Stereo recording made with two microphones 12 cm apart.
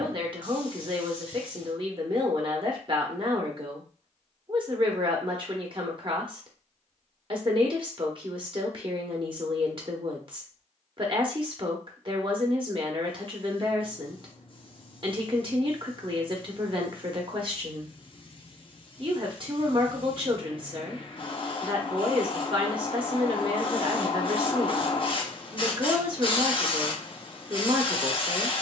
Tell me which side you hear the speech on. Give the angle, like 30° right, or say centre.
40° right.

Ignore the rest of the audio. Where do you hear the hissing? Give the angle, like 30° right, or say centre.
40° left.